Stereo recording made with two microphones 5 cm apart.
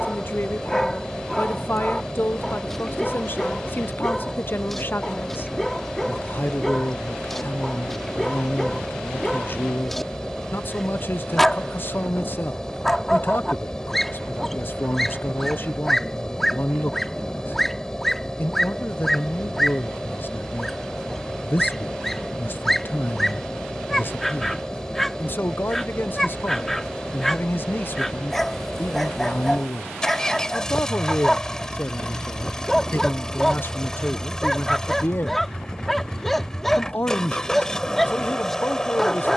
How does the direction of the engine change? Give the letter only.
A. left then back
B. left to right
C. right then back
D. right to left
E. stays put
E.